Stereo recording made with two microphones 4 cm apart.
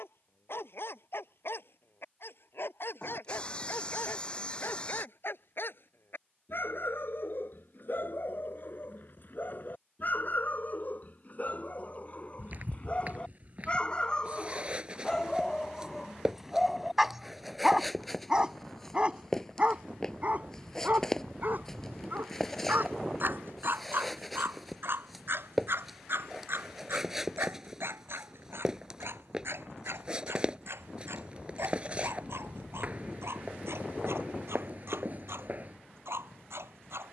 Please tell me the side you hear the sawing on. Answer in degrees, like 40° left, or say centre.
30° left.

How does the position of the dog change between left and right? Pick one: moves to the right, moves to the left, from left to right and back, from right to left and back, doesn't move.
moves to the right.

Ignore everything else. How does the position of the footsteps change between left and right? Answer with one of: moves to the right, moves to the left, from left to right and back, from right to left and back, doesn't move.
from right to left and back.